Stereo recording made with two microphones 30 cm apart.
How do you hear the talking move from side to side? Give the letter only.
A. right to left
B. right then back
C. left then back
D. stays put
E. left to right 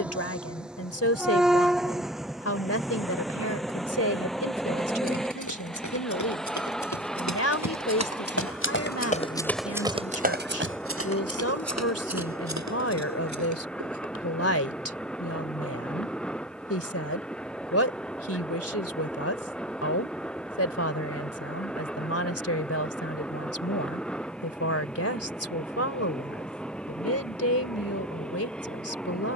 D.